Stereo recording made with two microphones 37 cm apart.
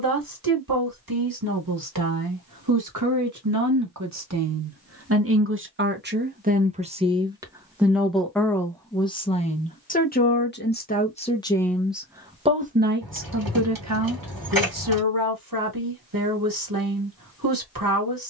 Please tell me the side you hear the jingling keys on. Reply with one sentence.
In this clip you hear the jingling keys on the right.